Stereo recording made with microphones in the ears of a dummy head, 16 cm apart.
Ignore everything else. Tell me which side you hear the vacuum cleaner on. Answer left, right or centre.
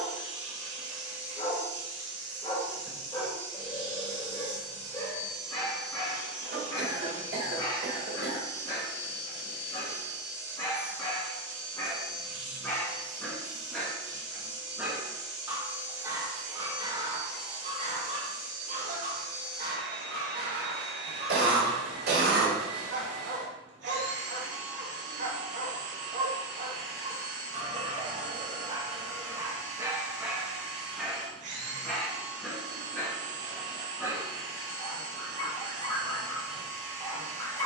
right.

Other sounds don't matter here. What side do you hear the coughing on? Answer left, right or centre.
right.